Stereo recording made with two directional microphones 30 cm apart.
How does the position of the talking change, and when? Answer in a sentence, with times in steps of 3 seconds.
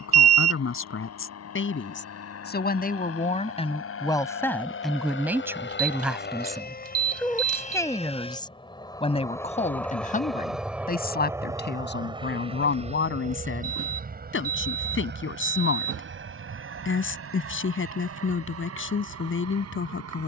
You can hear the talking on the left from 0 s, in the centre from 3 s and on the left from 9 s.